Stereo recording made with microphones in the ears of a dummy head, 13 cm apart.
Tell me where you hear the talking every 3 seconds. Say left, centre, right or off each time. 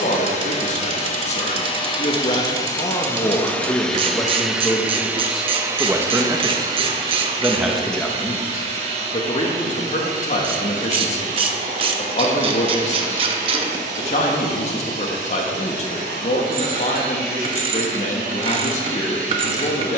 left, centre, centre, left, left, left, left.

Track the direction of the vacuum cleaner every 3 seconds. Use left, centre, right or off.
left, centre, right, right, right, right, right.